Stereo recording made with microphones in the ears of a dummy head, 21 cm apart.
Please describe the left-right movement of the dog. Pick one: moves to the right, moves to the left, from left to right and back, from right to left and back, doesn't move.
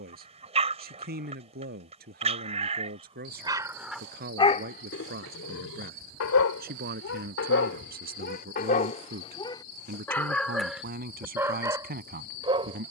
from right to left and back.